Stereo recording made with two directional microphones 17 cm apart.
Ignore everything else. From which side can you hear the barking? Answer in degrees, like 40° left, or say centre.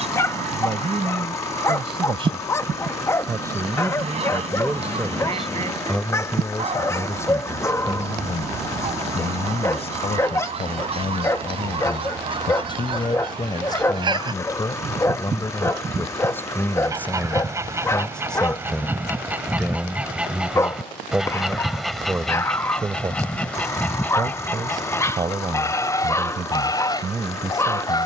20° left.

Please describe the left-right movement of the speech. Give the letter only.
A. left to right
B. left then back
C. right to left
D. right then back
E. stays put
B.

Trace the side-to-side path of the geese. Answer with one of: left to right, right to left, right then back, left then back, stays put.
right to left.